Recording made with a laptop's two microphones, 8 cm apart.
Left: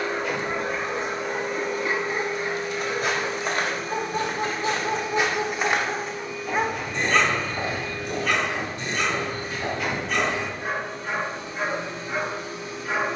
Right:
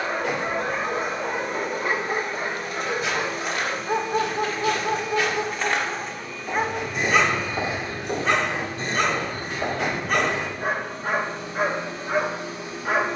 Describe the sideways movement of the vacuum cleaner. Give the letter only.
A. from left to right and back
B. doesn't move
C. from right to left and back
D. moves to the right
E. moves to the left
D.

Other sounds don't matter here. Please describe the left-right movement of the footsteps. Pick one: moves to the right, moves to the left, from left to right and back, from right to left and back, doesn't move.
moves to the right.